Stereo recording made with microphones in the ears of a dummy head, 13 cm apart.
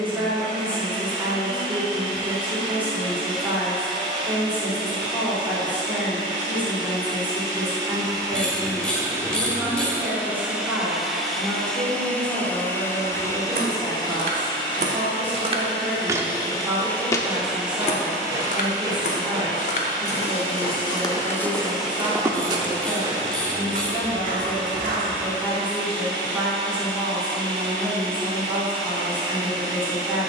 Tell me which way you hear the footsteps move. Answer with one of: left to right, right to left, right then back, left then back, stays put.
left then back.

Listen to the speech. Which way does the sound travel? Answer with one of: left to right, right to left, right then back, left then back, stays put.
stays put.